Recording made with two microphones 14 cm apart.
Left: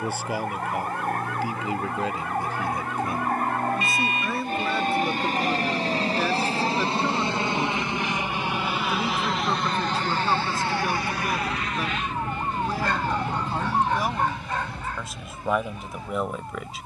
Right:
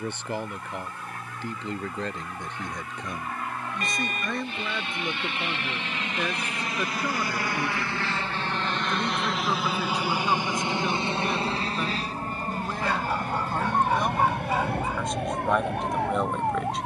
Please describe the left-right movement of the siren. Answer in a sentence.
In this clip you hear the siren move to the right.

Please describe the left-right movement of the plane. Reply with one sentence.
You can hear the plane move from left to right.